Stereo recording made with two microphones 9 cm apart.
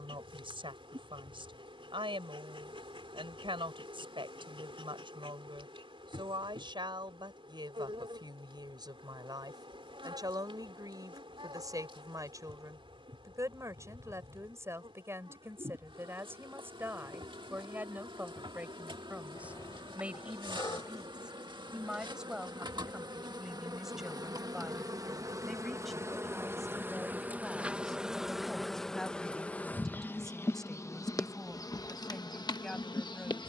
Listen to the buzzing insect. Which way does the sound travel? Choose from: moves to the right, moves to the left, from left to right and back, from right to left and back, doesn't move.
moves to the left.